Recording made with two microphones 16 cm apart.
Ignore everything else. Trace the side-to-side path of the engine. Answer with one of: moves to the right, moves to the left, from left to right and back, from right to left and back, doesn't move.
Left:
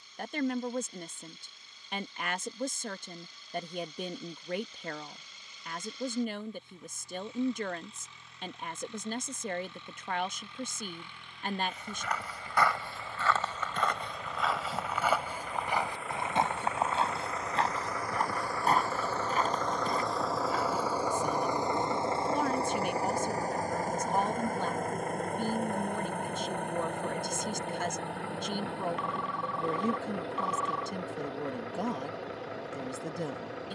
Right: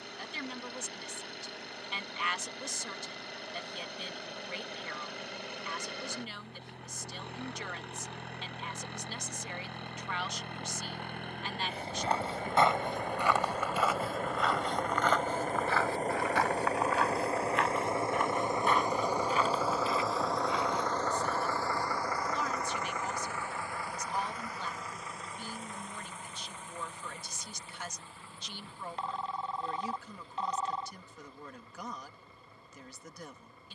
moves to the left.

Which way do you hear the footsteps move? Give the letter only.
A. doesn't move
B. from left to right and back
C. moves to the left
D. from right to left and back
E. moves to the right
C.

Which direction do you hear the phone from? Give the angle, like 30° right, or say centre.
30° right.